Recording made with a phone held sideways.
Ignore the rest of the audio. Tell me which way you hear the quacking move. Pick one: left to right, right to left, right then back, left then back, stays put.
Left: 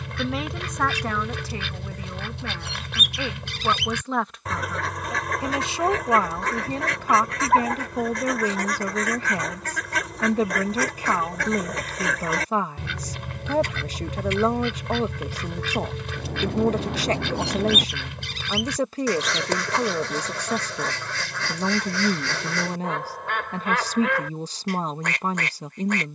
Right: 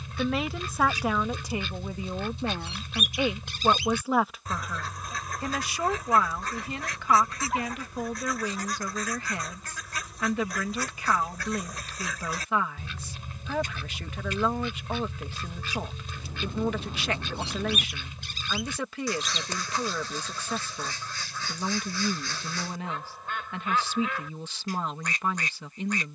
stays put.